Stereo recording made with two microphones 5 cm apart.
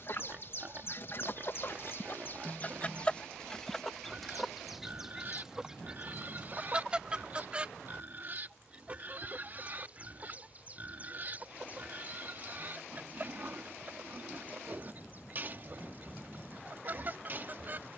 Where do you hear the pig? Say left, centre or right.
right.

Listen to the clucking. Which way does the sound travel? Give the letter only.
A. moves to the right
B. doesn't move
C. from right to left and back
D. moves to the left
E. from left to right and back
A.